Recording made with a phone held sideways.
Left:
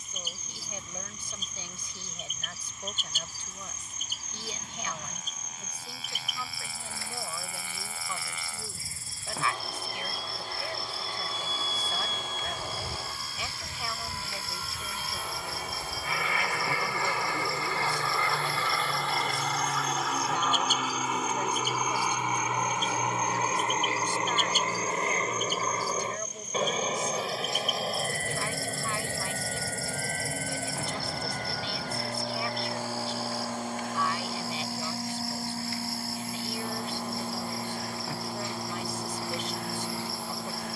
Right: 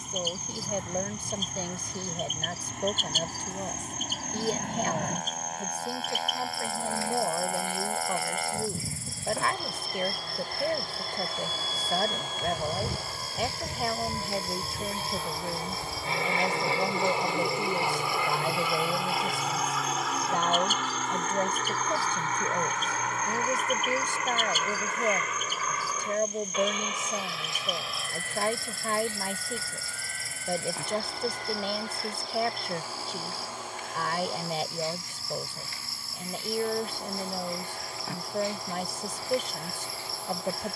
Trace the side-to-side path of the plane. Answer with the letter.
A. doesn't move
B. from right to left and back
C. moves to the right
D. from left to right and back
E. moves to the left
E.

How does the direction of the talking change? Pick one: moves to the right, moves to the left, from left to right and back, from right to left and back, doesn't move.
doesn't move.